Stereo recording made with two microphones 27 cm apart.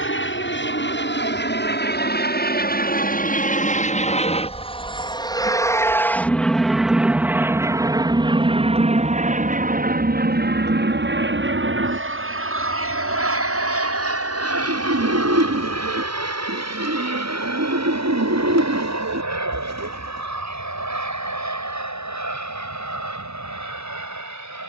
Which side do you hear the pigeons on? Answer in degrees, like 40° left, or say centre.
80° right.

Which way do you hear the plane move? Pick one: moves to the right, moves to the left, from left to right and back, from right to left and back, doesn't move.
moves to the right.